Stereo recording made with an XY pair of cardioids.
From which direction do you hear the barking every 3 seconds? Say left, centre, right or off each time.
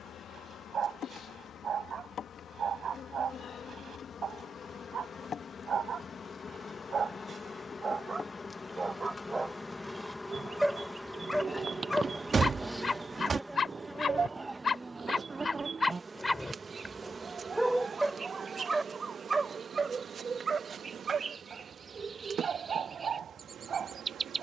right, right, right, centre, left, centre, right, right.